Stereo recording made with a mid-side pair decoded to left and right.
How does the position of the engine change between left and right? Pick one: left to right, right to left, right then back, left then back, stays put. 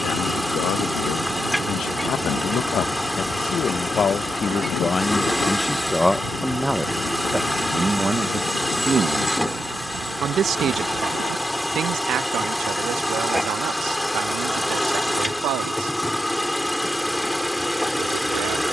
stays put.